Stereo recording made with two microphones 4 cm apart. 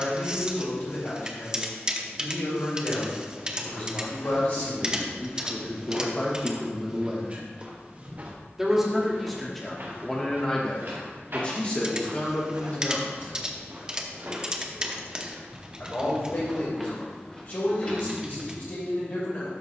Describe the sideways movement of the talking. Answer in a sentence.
You can hear the talking move from left to right and back again.